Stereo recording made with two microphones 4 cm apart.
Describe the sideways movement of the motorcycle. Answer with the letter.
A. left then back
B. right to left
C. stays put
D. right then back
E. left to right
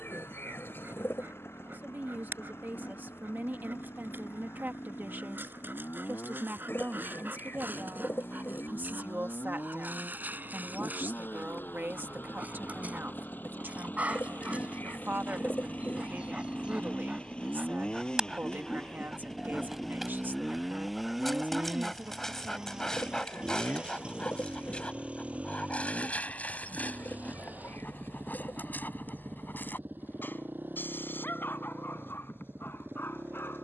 E.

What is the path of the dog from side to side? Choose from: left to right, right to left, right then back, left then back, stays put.
right to left.